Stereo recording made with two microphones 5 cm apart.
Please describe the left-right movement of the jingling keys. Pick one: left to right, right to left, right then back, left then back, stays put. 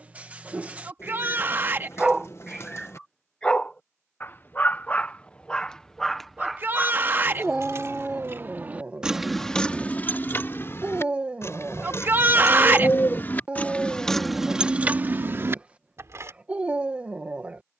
left then back.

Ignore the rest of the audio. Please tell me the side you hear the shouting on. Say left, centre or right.
right.